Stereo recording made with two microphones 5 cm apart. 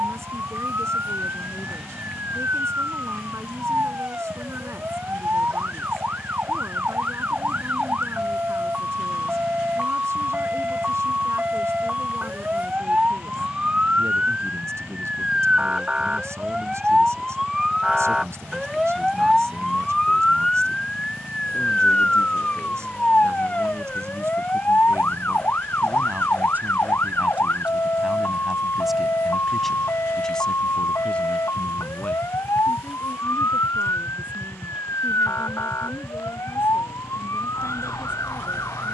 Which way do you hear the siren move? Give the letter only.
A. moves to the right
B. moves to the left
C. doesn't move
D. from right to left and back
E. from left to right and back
B.